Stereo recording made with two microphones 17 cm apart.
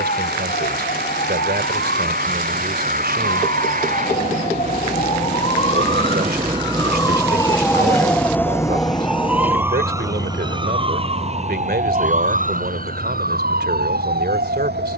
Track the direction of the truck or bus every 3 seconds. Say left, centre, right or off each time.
right, right, centre, left, left.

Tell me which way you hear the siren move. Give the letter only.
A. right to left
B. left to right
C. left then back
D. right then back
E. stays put
B.